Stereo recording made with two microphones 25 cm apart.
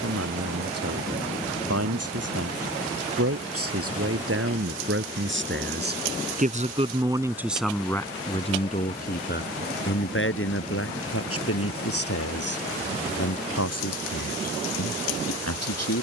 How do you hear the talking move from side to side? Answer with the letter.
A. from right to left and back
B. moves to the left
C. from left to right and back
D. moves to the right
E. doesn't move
B.